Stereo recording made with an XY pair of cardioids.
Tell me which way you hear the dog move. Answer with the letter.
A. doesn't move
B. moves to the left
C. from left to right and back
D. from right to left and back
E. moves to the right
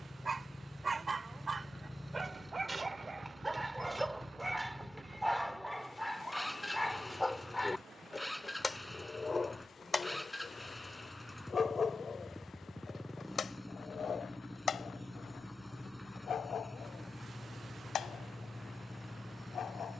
B.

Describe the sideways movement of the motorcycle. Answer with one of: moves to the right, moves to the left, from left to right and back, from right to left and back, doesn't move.
doesn't move.